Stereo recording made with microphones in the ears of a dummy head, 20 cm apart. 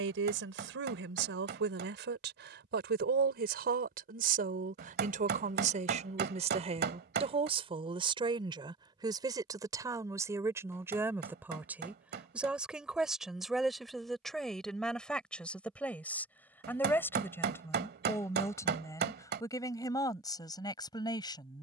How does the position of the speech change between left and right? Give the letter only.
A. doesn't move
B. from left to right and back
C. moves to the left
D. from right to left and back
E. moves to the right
C.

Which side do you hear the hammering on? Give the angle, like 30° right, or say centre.
50° right.